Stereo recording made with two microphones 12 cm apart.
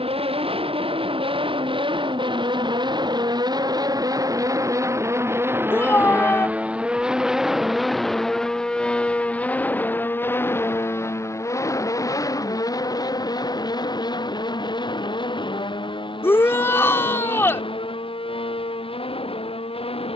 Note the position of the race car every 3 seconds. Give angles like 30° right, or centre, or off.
50° right, 30° right, centre, 20° left, 30° left, 40° left, 50° left.